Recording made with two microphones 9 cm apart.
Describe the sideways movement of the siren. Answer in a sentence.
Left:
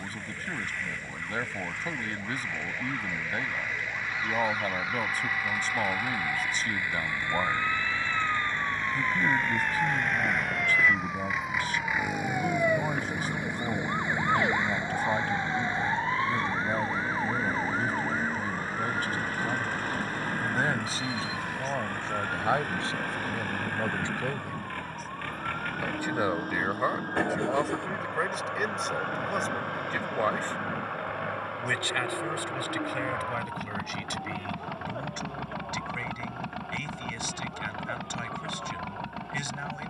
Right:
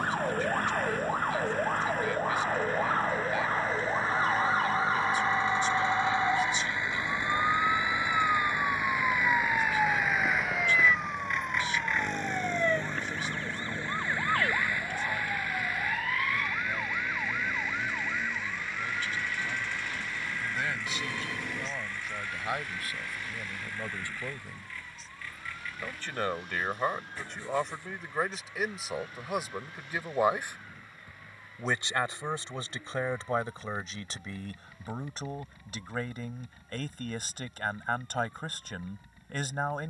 In this clip you hear the siren travel towards the left.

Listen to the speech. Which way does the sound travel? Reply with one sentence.
You can hear the speech move to the right.